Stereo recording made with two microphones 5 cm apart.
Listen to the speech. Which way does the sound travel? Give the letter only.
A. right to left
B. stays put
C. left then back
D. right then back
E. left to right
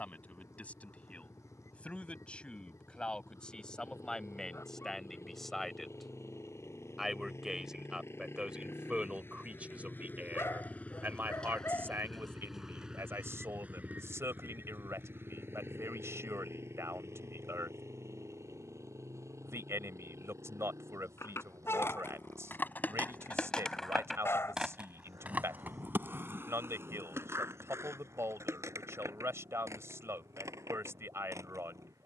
E.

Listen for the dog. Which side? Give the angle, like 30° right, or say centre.
50° left.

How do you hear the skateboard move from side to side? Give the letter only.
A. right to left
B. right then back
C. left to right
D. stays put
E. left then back
C.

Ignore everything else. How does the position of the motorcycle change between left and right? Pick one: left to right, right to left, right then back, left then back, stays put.
left to right.